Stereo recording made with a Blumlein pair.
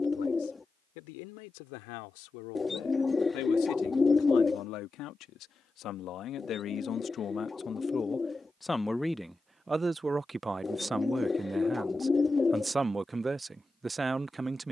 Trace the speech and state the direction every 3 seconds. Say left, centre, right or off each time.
left, left, left, centre, centre.